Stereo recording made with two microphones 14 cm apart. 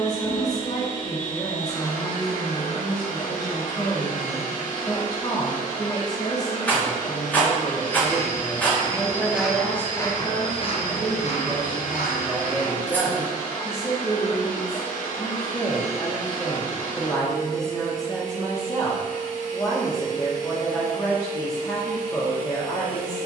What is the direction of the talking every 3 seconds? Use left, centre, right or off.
left, left, left, centre, centre, left, left, left.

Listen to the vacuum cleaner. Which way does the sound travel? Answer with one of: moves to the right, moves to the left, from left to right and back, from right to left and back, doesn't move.
doesn't move.